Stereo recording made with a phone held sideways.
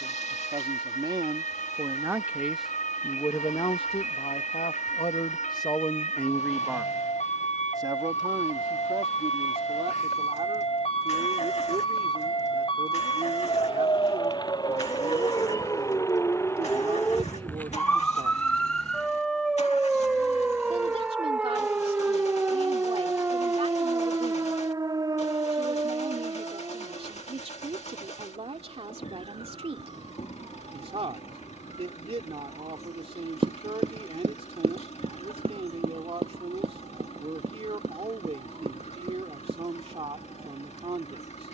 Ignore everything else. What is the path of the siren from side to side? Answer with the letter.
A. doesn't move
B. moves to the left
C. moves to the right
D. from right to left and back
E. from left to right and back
C.